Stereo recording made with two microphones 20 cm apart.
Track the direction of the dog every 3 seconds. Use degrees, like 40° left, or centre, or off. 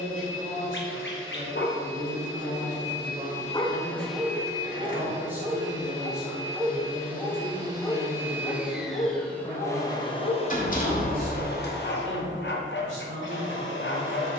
60° left, centre, 10° left, 40° left, 60° left.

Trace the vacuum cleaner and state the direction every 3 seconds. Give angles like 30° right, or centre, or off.
70° left, 10° right, 20° right, 30° left, 60° left.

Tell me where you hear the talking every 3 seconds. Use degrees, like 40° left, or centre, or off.
30° right, 20° right, centre, 20° left, 30° left.